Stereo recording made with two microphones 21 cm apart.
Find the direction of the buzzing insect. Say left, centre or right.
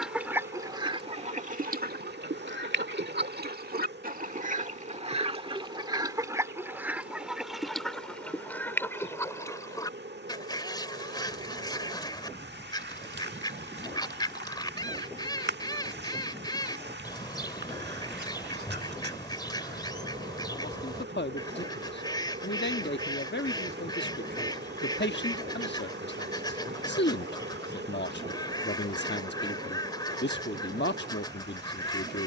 right.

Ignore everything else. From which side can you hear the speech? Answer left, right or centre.
left.